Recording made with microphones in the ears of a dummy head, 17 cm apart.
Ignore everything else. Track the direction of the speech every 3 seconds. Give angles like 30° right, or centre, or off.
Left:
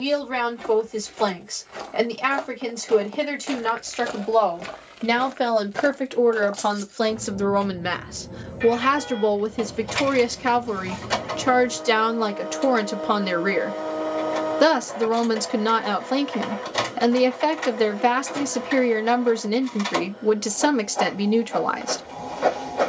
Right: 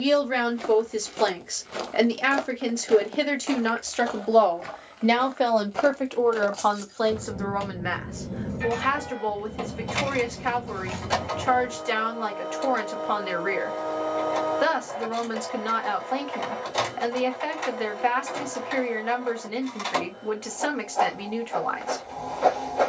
20° right, 10° right, 40° left, 60° left, 60° left, 60° left, 60° left, 60° left.